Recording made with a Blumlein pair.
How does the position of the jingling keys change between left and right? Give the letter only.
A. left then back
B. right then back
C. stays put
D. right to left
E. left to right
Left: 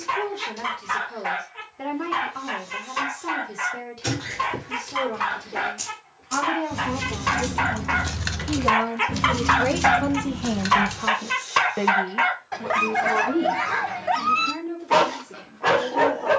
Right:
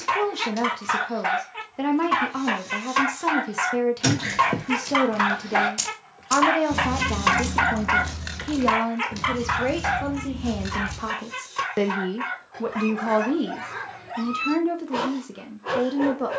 D.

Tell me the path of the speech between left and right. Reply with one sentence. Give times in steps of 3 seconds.
You can hear the speech on the right from 0 s, in the centre from 9 s and on the right from 12 s.